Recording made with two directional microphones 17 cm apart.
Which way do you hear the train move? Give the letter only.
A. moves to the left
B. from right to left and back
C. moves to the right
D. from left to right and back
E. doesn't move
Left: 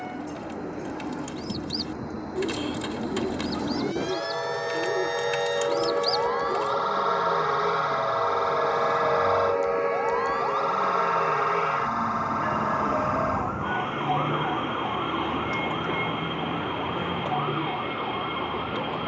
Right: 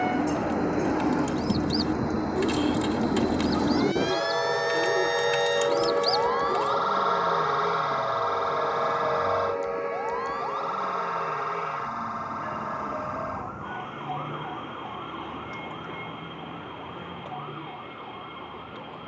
A.